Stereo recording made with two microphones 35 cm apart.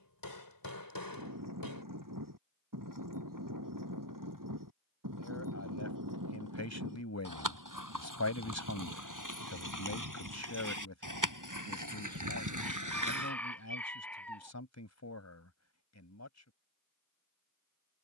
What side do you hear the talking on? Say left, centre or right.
left.